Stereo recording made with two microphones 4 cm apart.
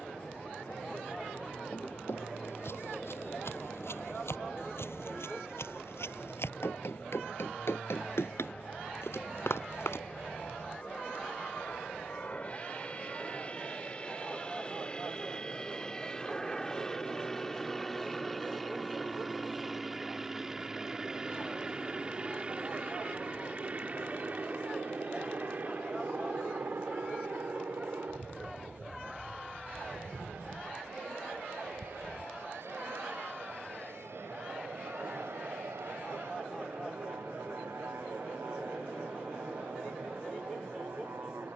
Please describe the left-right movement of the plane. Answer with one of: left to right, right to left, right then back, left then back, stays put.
left to right.